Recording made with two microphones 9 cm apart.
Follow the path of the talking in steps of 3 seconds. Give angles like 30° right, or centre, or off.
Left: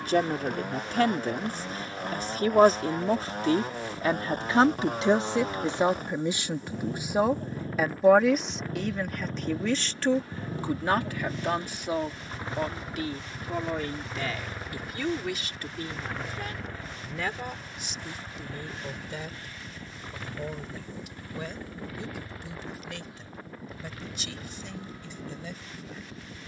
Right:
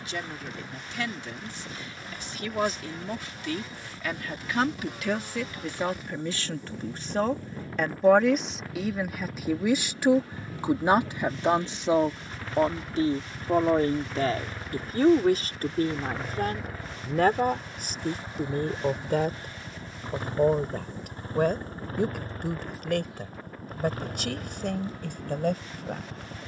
50° left, 30° left, 10° left, 20° right, 40° right, 50° right, 60° right, 60° right, 70° right.